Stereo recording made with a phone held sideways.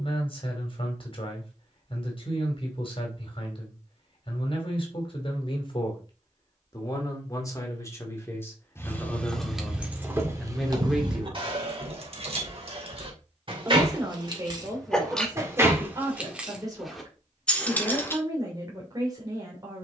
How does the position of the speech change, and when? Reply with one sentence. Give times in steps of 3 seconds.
You can hear the speech on the left from 0 s, in the centre from 9 s and on the right from 12 s.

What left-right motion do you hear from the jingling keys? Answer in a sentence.
You can hear the jingling keys go right and come back.